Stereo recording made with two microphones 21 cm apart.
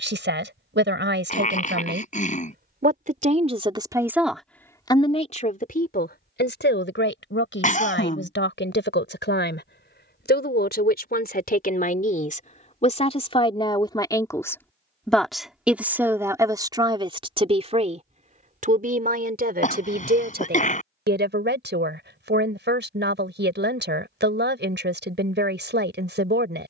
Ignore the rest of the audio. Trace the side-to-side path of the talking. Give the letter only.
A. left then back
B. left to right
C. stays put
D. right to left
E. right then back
A.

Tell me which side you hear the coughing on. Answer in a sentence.
You can hear the coughing on the left.